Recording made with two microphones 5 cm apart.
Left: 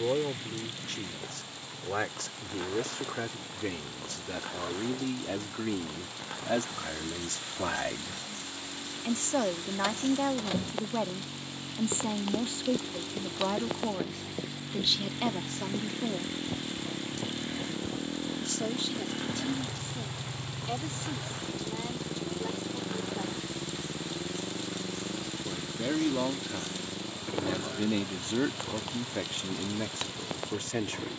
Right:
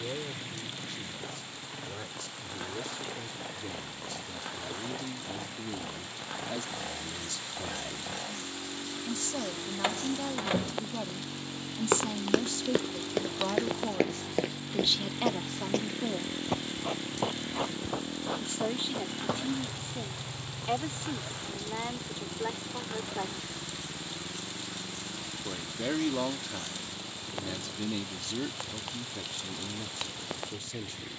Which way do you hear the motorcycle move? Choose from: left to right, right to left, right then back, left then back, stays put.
right to left.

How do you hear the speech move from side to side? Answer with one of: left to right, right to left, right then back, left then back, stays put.
right then back.